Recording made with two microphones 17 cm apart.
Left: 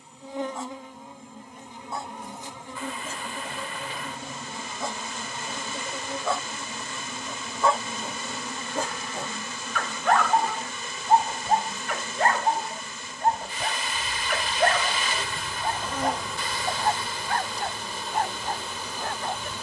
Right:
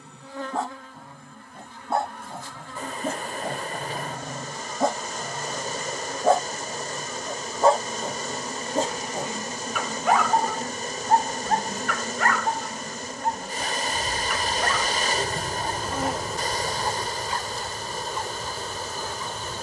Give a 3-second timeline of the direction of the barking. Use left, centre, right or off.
right, right, right, centre, left, left, left.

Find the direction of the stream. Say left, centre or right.
right.